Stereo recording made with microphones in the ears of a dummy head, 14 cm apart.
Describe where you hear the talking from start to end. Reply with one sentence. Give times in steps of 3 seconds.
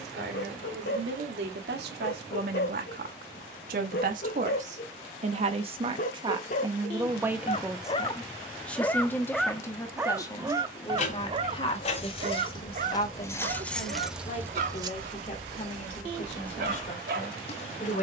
You can hear the talking on the right from 0 s, in the centre from 6 s and on the left from 9 s.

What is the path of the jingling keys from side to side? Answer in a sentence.
You can hear the jingling keys go right and come back.